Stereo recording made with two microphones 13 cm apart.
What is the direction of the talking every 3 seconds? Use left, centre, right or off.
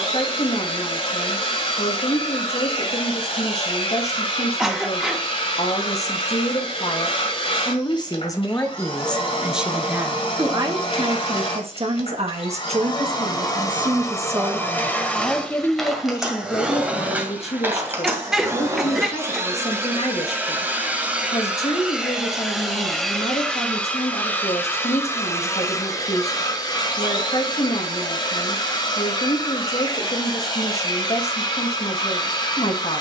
left, left, left, right, right, left, left, left, left, left, left.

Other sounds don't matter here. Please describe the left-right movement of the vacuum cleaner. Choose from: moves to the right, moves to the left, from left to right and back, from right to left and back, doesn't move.
from left to right and back.